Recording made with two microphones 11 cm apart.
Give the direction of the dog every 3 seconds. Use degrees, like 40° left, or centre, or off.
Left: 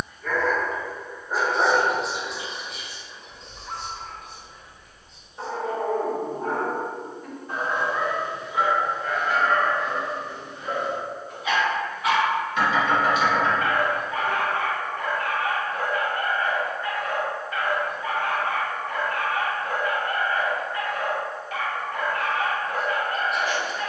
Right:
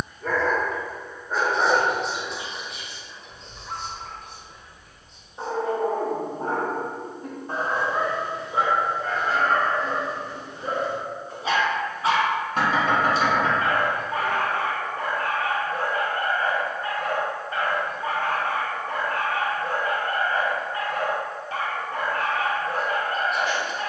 10° left, centre, 30° right, 30° right, 30° right, 30° right, 30° right, 30° right.